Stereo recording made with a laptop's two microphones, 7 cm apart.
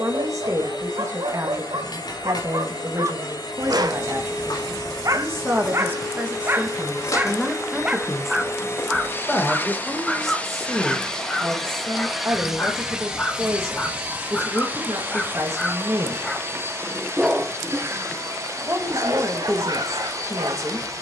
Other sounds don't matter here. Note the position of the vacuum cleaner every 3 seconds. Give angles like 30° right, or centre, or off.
70° left, 60° left, 50° left, 20° left, 10° right, 30° right, 50° right.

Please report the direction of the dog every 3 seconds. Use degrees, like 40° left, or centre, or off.
80° right, 50° right, 20° right, 10° left, 20° left, 10° right, 70° right.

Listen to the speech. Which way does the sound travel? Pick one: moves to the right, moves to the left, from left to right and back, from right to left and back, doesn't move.
from right to left and back.